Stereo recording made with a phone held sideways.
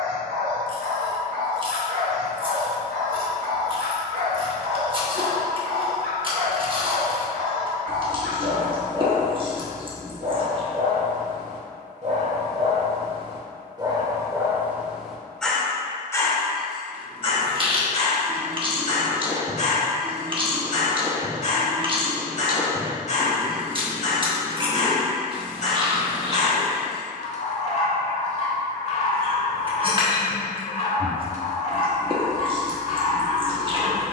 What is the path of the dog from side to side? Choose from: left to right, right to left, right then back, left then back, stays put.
right to left.